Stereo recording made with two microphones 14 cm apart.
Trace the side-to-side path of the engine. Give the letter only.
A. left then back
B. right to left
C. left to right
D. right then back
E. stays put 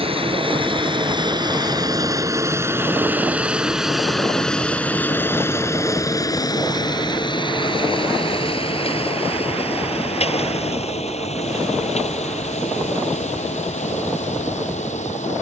B.